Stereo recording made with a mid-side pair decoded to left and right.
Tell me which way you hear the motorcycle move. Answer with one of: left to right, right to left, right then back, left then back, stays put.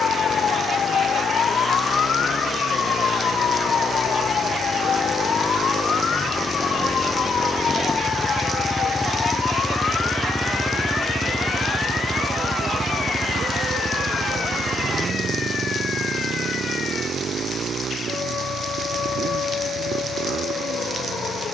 left to right.